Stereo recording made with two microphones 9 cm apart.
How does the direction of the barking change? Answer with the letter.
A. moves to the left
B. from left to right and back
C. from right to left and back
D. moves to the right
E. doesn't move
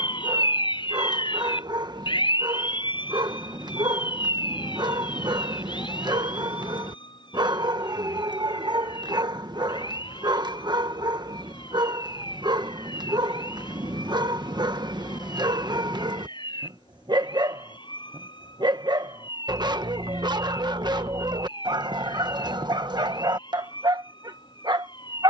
E.